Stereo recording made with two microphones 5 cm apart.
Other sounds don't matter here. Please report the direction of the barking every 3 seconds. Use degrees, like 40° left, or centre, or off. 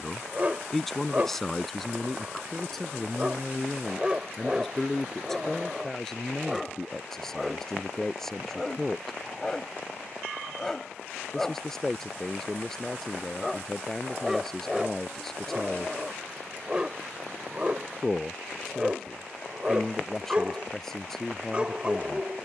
30° right, 10° right, 10° left, 10° left, centre, 10° right, 20° right, 20° right.